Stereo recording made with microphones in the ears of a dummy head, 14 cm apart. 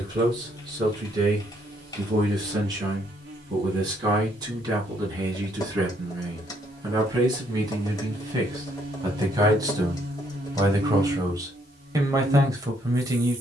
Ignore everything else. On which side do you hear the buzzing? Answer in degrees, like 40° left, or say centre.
60° right.